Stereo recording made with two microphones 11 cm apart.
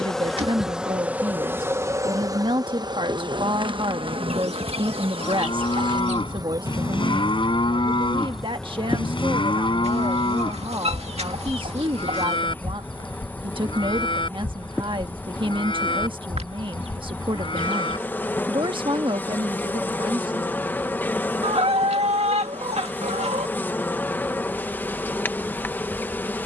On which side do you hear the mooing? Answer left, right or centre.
left.